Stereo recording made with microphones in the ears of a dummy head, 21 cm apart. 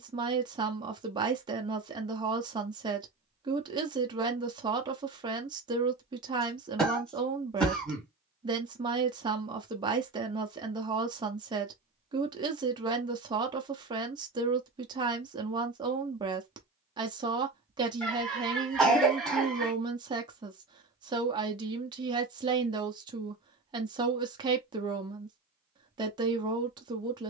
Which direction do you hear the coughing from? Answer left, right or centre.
centre.